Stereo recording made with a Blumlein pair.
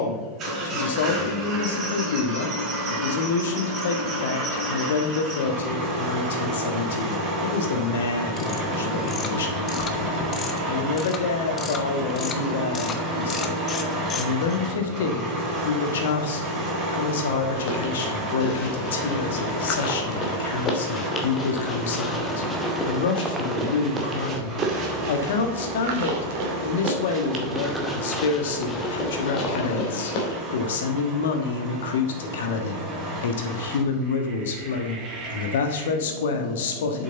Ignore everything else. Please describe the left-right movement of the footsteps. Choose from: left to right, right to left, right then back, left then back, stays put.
right then back.